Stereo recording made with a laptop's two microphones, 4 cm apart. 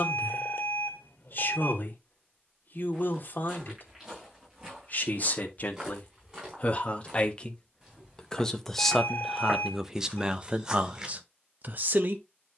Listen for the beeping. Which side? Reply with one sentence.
In this clip you hear the beeping on the left.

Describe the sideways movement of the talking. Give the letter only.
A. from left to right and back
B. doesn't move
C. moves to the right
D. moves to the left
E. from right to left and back
C.